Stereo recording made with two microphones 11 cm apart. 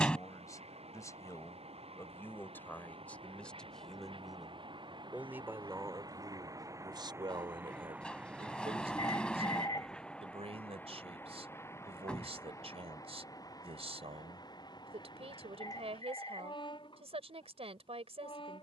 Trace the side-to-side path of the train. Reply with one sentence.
You can hear the train move to the left.